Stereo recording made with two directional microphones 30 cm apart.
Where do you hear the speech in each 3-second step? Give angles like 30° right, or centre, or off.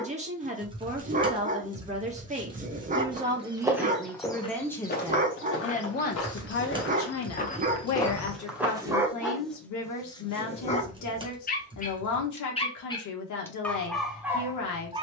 20° right, centre, 50° left, 60° left, 60° left.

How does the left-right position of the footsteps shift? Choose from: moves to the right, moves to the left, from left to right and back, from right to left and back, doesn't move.
from right to left and back.